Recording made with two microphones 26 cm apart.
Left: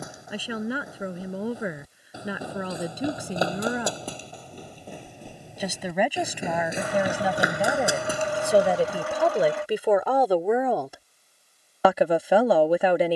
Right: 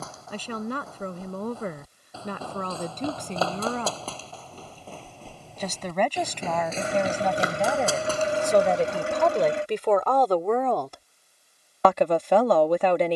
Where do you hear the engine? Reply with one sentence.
You can hear the engine on the right.